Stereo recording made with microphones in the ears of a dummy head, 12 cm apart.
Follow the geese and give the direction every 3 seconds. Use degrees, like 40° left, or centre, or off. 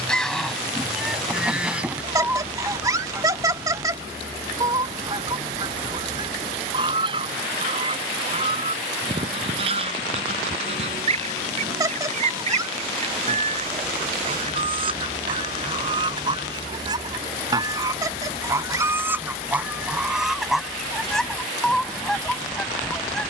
10° right, 20° right, 30° right, 40° right, 40° right, 30° right, 10° right, centre.